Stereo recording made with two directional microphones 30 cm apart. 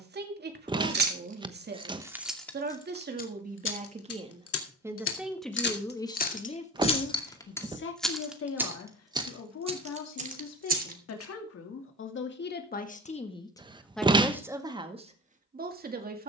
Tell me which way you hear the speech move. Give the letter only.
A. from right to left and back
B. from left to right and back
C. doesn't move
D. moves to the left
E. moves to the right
A.